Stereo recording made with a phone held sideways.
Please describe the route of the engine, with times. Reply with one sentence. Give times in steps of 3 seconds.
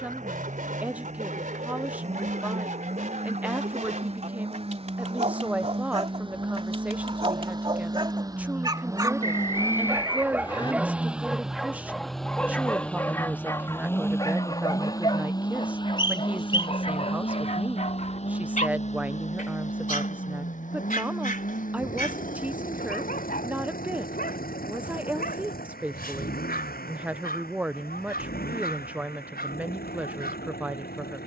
You can hear the engine on the right from 0 s, in the centre from 9 s and on the left from 15 s.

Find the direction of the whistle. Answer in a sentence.
In this clip you hear the whistle on the left.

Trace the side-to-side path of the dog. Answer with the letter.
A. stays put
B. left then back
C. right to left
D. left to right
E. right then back
C.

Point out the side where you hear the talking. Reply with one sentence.
In this clip you hear the talking in the centre.